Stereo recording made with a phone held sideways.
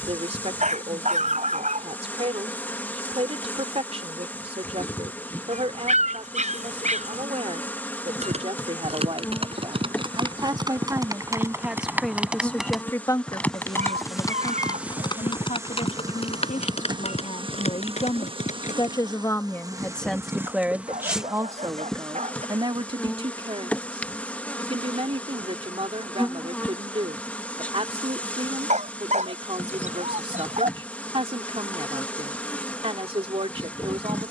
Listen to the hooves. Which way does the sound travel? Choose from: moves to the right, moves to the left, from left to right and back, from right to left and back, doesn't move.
moves to the left.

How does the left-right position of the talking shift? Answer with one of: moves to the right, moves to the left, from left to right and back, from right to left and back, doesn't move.
from right to left and back.